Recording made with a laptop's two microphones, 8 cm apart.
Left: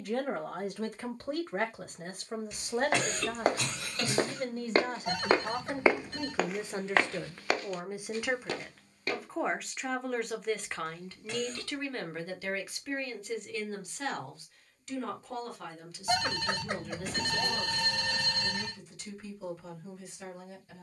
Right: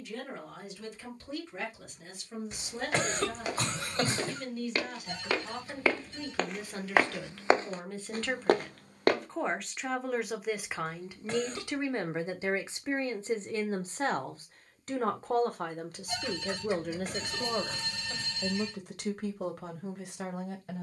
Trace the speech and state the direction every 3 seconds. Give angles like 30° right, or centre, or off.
50° left, 40° left, 20° left, 10° right, 30° right, 50° right, 60° right.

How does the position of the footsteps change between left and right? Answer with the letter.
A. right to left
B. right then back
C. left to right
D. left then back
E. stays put
C.